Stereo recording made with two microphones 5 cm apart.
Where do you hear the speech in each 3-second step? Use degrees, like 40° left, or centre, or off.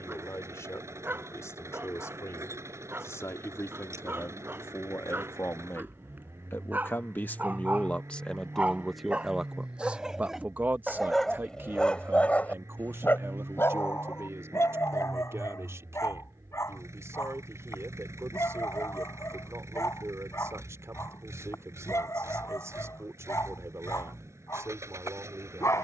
80° left, 70° left, 30° left, 30° right, 60° right, 70° right, 70° right, 70° right, 70° right.